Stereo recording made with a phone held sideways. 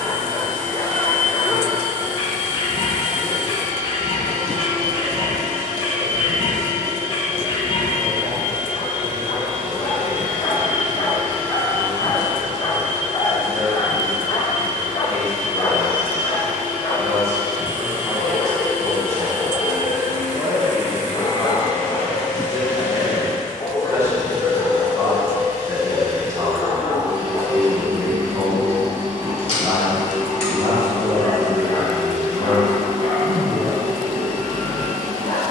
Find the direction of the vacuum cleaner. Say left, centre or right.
right.